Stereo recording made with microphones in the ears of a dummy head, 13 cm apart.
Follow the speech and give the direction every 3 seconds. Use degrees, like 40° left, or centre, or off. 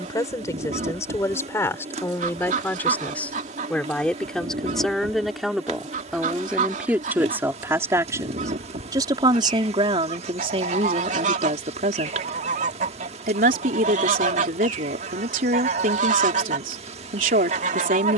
20° left, centre, 10° right, 40° right, 60° right, 60° right.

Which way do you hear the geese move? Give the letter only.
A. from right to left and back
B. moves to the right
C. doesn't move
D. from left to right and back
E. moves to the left
C.